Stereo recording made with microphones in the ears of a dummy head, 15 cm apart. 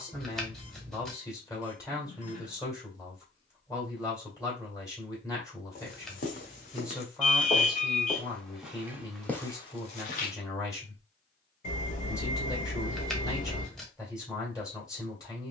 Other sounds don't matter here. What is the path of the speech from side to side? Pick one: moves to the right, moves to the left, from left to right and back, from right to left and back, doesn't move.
doesn't move.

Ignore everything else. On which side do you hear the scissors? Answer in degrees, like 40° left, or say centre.
centre.